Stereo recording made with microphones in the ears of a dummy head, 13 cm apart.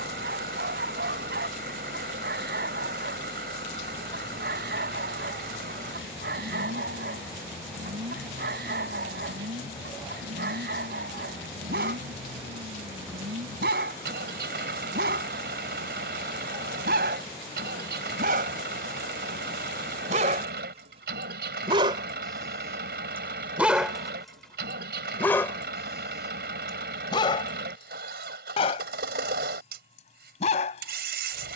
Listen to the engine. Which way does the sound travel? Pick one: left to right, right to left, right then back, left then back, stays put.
stays put.